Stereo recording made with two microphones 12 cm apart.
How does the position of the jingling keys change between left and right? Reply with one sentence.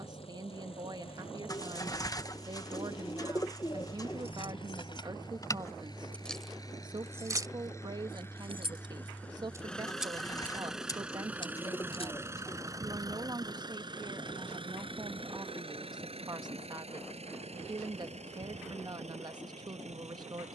You can hear the jingling keys go right and come back.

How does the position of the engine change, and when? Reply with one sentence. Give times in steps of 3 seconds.
You can hear the engine on the left from 0 s, in the centre from 9 s and on the right from 12 s.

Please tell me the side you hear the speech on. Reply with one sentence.
You can hear the speech on the right.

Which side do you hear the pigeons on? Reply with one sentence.
You can hear the pigeons on the left.